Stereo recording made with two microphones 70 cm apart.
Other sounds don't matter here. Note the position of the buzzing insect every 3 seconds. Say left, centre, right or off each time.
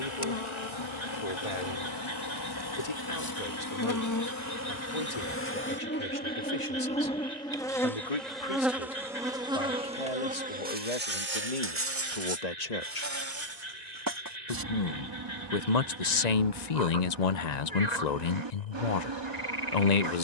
left, left, centre, centre, right, right, right.